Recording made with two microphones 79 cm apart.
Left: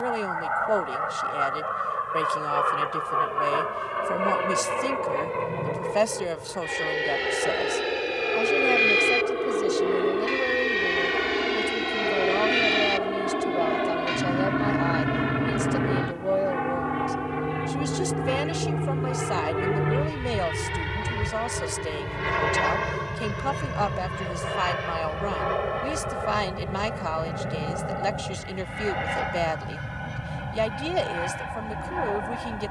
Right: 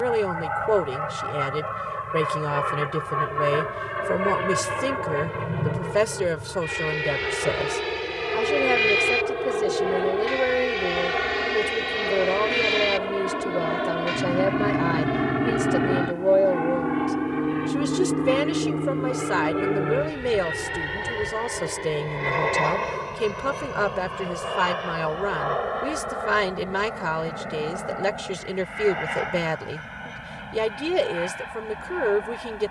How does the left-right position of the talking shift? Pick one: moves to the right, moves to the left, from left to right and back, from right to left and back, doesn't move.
doesn't move.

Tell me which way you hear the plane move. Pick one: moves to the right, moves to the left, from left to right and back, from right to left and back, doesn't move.
moves to the left.